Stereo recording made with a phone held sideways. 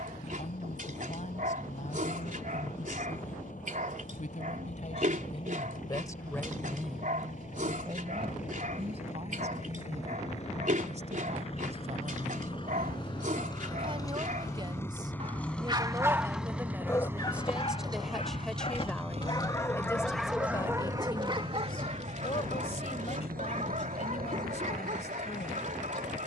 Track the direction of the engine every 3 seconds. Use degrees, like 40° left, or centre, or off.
60° left, 60° left, 50° left, 50° left, 30° left, 10° right, 50° right, 70° right, 80° right.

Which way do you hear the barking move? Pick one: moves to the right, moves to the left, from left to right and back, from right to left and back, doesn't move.
from right to left and back.